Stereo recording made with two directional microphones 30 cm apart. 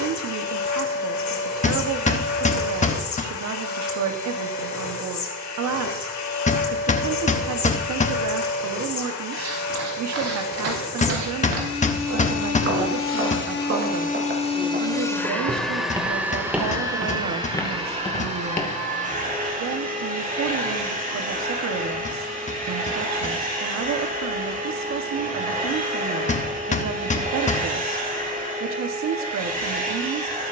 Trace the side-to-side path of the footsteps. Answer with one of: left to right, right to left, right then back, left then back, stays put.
right to left.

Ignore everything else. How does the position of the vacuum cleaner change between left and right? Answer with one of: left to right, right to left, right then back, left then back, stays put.
left to right.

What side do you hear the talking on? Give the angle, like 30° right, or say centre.
60° right.